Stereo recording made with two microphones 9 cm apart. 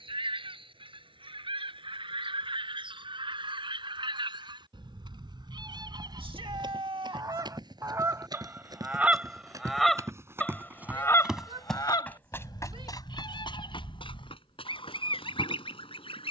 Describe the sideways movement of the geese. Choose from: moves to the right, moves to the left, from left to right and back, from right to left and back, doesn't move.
moves to the left.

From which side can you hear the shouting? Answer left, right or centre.
right.